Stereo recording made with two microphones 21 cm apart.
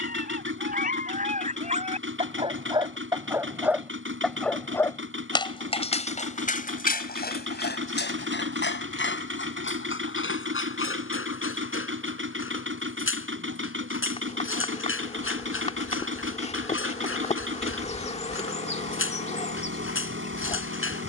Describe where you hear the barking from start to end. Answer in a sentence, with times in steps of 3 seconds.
You can hear the barking on the right from 0 s, in the centre from 3 s and on the left from 6 s.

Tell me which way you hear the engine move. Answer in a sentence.
You can hear the engine stay put.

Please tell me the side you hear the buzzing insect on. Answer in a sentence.
In this clip you hear the buzzing insect on the left.